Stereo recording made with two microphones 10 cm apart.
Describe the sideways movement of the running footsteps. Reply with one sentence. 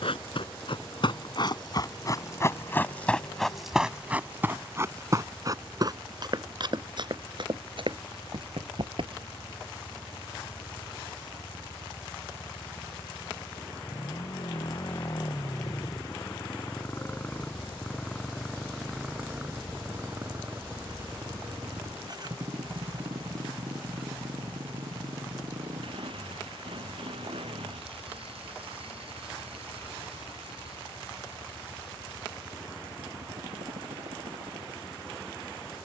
In this clip you hear the running footsteps move to the right.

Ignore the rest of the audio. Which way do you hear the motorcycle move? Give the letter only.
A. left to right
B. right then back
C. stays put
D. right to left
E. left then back
A.